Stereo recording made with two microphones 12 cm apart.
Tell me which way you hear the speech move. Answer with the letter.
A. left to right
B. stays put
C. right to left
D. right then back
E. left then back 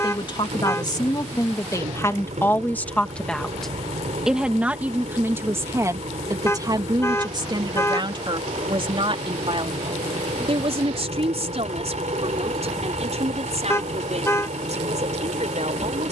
A.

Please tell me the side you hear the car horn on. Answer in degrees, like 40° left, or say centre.
20° left.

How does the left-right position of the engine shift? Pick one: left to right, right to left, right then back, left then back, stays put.
stays put.